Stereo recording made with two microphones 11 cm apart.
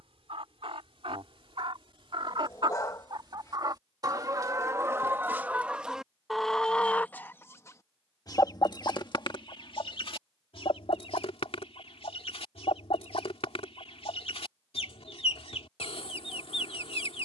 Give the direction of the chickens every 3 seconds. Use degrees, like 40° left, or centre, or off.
50° right, 30° right, 20° left, 60° left, 60° left, 60° left.